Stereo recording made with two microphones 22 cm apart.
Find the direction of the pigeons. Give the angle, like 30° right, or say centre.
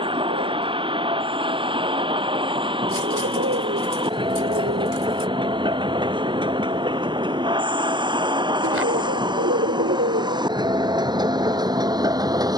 80° right.